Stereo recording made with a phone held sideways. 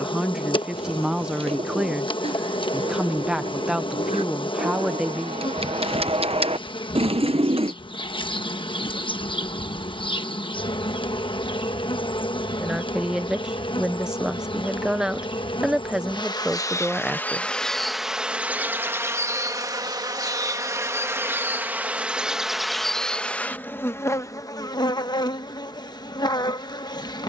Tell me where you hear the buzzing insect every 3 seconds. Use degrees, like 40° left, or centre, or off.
40° left, 40° left, 40° left, 40° left, 40° left, 20° left, 20° right, centre, 30° left.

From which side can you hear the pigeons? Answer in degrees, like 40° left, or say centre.
40° right.